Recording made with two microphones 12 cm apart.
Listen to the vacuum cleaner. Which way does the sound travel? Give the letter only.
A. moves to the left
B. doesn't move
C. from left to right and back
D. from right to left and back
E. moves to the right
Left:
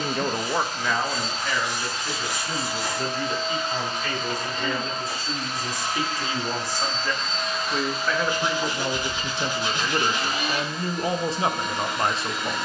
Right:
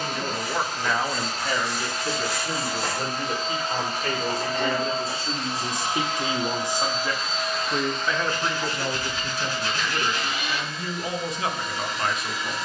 A.